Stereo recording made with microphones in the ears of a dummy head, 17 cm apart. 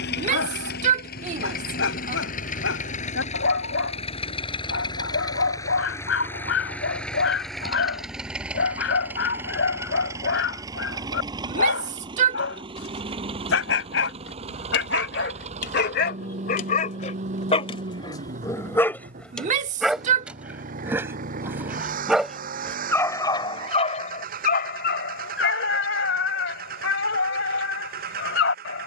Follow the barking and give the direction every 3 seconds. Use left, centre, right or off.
left, left, left, left, left, left, centre, centre, left, left.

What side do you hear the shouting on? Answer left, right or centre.
right.